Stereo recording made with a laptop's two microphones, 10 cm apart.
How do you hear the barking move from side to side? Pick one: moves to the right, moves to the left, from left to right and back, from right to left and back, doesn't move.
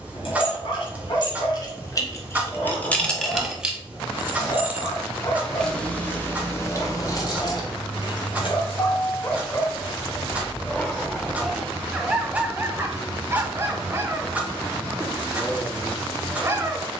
moves to the right.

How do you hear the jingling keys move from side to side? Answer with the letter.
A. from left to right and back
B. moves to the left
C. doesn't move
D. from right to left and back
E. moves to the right
A.